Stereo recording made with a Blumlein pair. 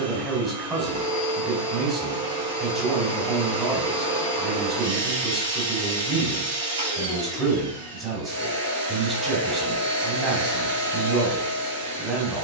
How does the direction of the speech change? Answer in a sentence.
In this clip you hear the speech stay put.